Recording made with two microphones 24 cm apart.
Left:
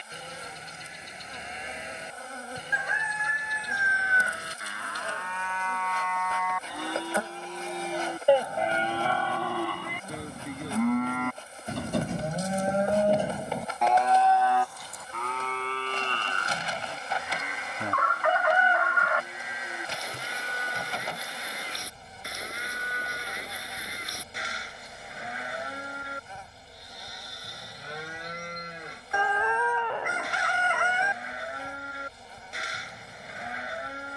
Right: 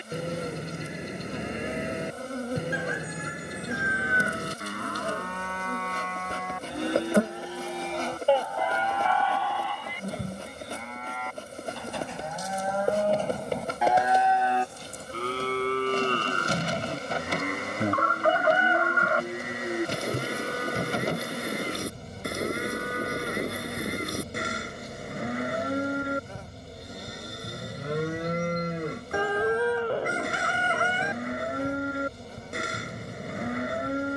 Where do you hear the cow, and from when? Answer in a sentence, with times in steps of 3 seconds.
You can hear the cow on the right from 0 s, in the centre from 6 s, on the left from 9 s, in the centre from 12 s and on the right from 15 s.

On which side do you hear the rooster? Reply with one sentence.
In this clip you hear the rooster on the right.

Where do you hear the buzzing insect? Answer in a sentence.
In this clip you hear the buzzing insect on the right.